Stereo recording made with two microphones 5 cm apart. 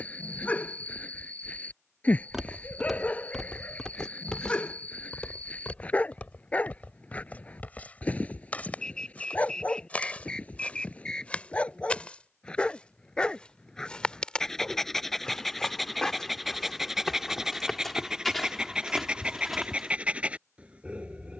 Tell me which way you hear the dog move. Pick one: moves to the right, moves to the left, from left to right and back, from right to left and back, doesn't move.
moves to the right.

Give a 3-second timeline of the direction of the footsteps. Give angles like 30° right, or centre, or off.
10° right, 20° left, 30° left, 20° left, 20° left, 10° left, centre.